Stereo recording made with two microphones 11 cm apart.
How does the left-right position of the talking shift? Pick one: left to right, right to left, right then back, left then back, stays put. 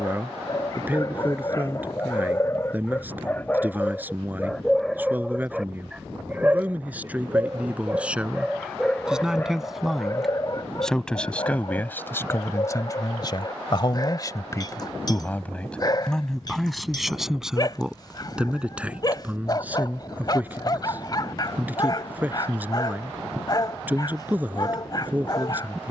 left then back.